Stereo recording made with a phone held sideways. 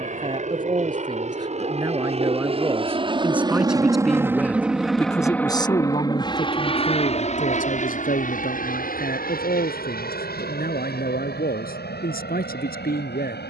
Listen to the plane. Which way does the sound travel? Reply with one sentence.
In this clip you hear the plane move to the left.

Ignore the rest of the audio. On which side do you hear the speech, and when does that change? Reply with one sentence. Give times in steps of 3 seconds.
In this clip you hear the speech on the right from 0 s, in the centre from 3 s and on the left from 6 s.